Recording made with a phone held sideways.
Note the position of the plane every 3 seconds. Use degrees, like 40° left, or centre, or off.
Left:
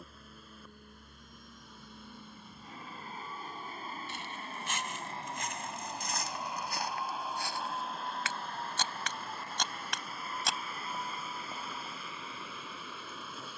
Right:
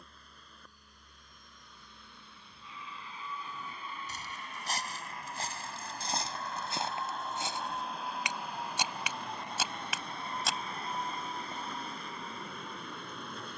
60° left, 40° left, centre, 30° right, 40° right.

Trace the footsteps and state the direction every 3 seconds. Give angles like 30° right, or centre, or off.
off, 40° right, 20° right, centre, off.